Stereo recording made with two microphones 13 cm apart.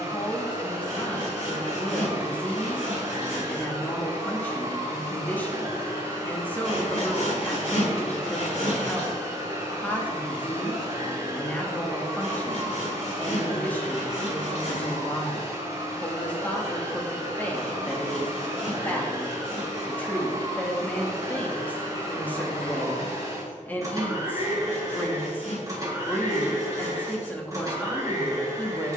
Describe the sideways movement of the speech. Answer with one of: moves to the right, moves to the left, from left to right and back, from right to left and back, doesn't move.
doesn't move.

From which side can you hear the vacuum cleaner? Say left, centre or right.
right.